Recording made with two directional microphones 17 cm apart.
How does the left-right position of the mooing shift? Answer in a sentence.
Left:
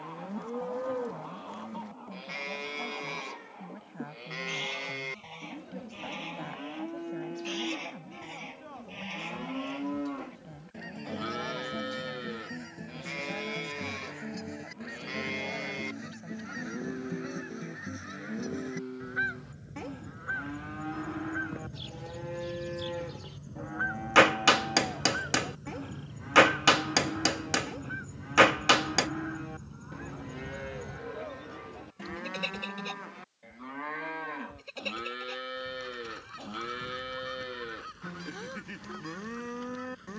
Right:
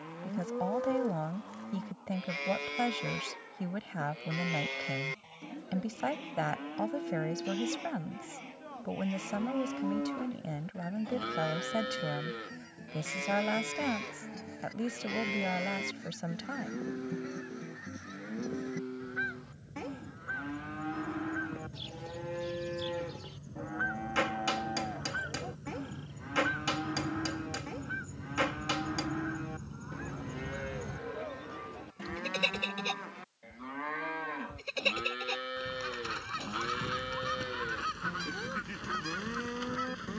You can hear the mooing stay put.